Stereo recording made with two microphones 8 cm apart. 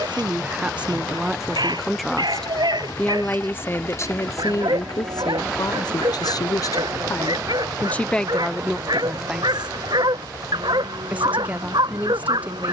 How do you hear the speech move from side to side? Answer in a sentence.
In this clip you hear the speech go left and come back.